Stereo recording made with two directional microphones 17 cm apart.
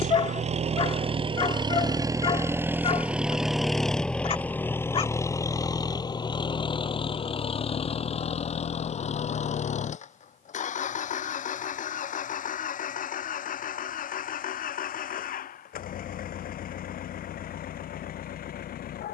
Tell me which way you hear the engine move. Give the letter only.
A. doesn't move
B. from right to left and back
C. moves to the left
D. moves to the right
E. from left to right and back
C.